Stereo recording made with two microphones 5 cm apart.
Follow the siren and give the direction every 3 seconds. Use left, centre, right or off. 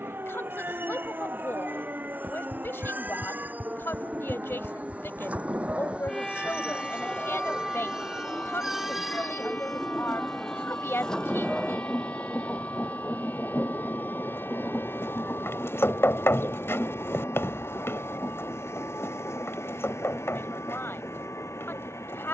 right, centre, left, left, left, left, left, left.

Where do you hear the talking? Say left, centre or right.
left.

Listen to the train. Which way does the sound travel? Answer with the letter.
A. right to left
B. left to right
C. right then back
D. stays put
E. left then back
A.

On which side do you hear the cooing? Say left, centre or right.
left.